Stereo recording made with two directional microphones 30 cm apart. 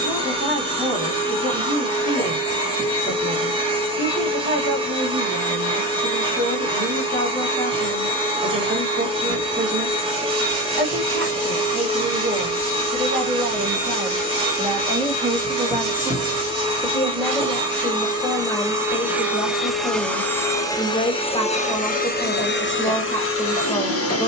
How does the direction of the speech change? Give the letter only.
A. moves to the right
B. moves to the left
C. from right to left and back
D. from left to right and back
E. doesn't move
B.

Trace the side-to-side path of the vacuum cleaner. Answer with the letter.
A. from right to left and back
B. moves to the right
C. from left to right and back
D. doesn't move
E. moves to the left
E.